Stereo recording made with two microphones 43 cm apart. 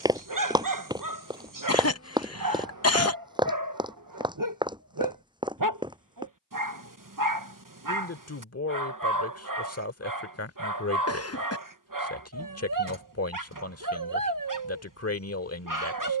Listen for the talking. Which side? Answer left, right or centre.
left.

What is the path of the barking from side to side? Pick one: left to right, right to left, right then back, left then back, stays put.
stays put.